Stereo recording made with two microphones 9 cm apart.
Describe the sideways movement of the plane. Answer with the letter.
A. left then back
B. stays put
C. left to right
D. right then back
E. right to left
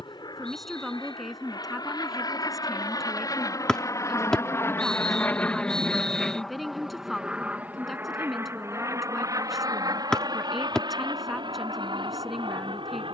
C.